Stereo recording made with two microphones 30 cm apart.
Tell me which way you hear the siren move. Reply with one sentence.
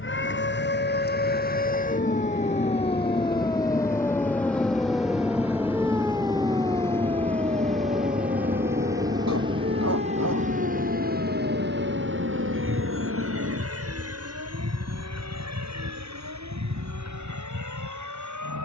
In this clip you hear the siren move from left to right.